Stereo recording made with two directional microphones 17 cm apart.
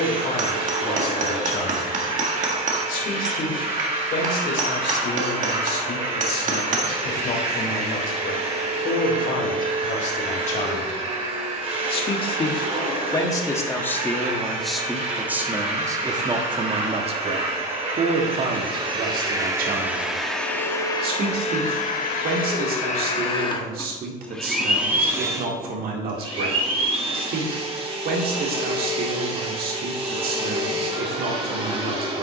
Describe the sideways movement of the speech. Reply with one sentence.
In this clip you hear the speech move to the right.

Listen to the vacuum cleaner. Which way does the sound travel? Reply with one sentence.
You can hear the vacuum cleaner go left and come back.